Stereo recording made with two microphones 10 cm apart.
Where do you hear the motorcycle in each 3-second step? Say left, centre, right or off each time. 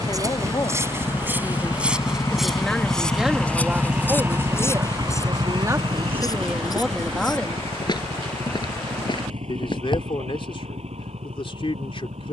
left, right, right, right.